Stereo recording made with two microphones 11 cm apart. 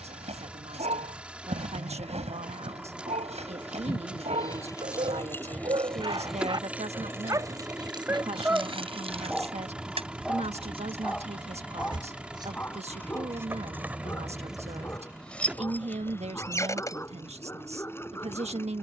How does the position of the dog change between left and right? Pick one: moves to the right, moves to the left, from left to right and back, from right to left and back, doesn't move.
moves to the left.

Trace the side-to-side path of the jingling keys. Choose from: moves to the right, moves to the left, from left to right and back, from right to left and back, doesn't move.
from left to right and back.